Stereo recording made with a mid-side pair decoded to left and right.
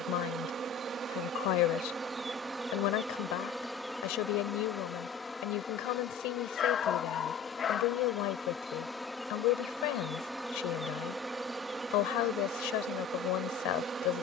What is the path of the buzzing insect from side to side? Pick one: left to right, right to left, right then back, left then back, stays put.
left then back.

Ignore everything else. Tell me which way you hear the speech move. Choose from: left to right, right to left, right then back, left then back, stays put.
stays put.